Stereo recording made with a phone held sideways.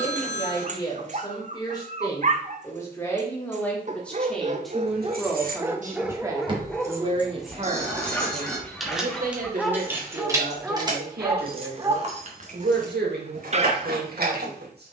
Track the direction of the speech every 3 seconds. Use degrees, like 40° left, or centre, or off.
20° left, centre, 30° right, 70° right, 80° right.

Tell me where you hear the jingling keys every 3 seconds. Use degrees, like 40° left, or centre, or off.
off, 60° right, 10° right, 20° right, 60° right.